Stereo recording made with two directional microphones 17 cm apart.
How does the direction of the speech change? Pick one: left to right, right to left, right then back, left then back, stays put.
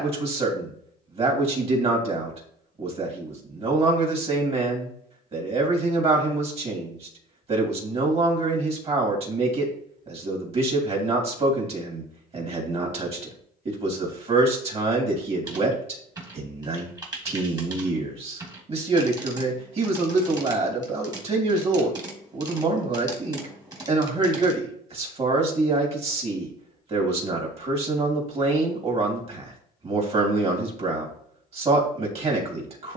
stays put.